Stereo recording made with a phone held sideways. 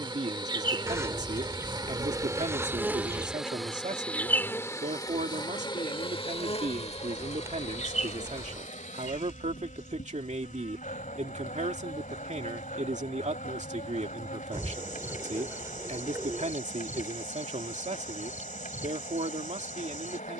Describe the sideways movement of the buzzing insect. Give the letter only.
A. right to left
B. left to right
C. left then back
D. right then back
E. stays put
A.